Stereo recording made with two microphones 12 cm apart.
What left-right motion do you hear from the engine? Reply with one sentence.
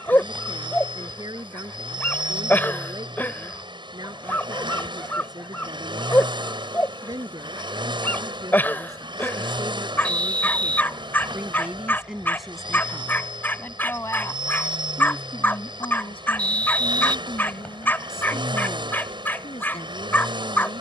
You can hear the engine stay in one place.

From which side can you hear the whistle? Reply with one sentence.
In this clip you hear the whistle in the centre.